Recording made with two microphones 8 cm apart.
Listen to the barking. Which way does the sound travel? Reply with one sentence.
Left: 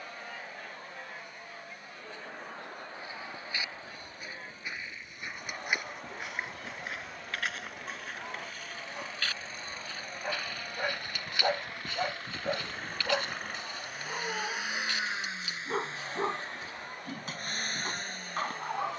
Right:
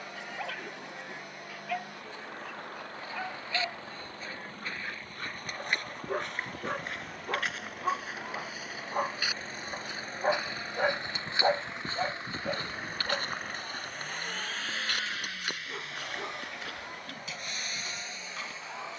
In this clip you hear the barking move to the left.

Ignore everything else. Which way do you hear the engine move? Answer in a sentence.
You can hear the engine go from the right side to the left.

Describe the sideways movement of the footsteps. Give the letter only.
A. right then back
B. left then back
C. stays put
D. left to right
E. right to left
D.